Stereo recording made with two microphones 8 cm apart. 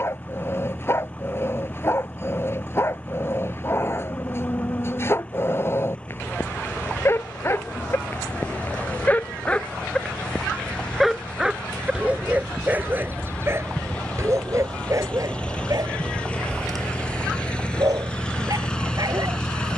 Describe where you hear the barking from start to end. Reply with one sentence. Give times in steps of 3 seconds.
In this clip you hear the barking on the left from 0 s, in the centre from 9 s and on the right from 12 s.